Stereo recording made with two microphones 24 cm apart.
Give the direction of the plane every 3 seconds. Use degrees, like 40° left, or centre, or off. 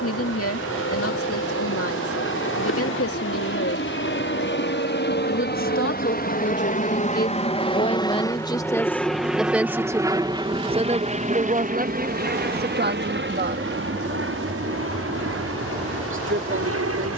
70° left, 50° left, 20° left, 20° right, 50° right, 60° right.